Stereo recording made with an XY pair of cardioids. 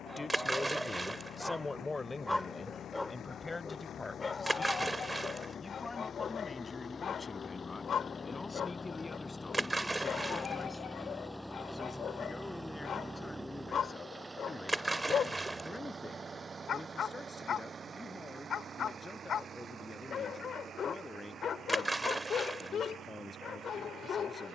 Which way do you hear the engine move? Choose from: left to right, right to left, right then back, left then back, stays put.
left to right.